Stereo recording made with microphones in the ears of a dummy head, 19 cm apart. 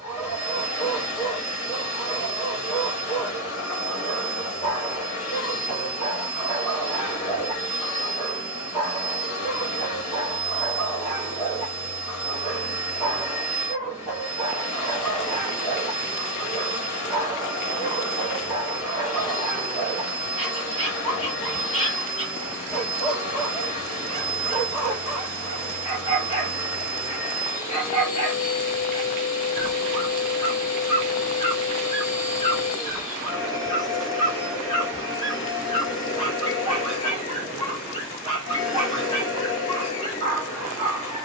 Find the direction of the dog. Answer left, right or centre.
left.